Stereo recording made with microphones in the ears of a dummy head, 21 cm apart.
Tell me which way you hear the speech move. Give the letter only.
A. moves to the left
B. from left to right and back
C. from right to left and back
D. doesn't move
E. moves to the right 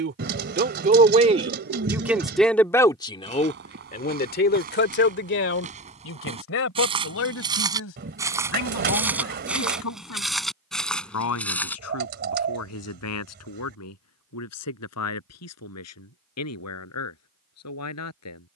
A.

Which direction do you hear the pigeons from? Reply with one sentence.
In this clip you hear the pigeons on the right.